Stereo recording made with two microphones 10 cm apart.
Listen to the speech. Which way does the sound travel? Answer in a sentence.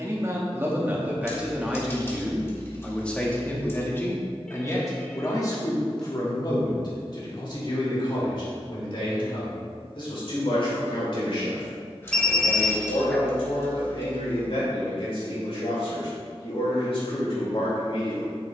In this clip you hear the speech move to the left.